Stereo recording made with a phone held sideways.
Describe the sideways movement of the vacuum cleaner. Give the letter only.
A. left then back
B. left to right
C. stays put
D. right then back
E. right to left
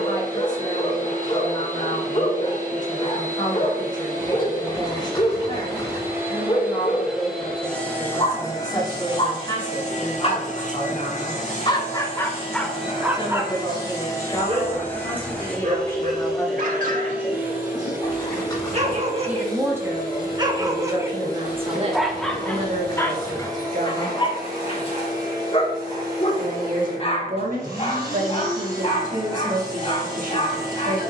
A.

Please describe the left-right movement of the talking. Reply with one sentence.
In this clip you hear the talking go from the left side to the right.